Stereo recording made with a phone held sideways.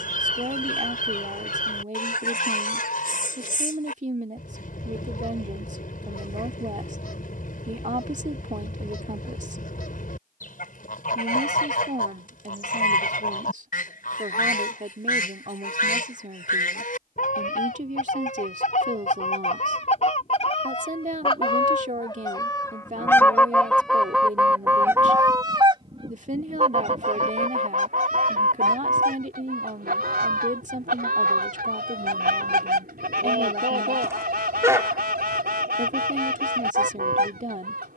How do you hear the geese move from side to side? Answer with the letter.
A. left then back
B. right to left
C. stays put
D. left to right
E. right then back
D.